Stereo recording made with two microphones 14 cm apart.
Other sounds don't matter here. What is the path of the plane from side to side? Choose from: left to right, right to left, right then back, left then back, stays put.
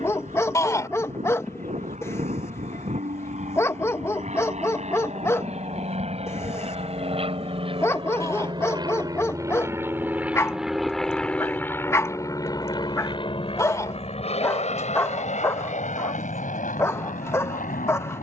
right to left.